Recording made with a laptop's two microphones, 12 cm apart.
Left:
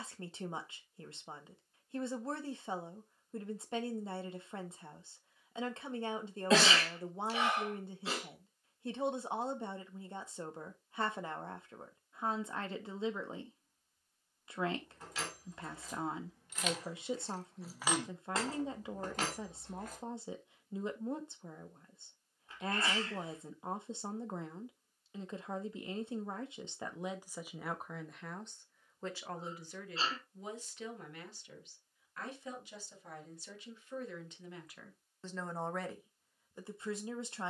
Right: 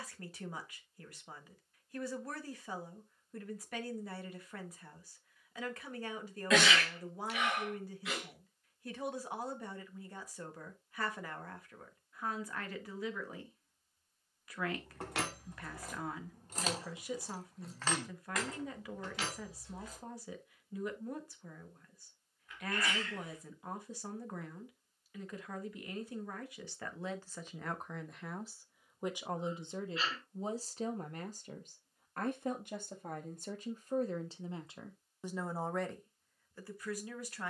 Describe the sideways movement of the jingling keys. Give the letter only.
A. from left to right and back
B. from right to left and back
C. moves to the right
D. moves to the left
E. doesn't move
D.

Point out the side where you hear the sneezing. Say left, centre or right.
left.